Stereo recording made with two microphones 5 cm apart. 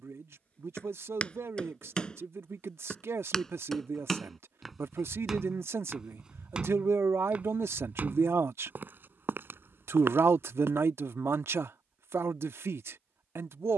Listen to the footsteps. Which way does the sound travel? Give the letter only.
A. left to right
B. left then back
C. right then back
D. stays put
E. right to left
A.